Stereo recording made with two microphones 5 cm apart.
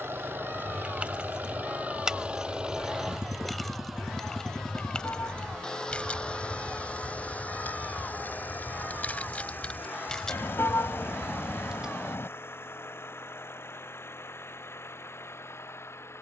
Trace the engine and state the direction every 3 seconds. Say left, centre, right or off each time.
right, centre, left, left, left, left.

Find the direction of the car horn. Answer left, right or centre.
left.